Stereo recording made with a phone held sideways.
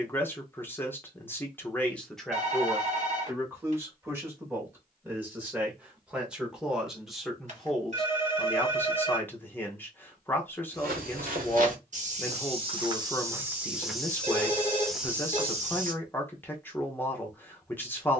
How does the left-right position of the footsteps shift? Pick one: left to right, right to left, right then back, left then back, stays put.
left then back.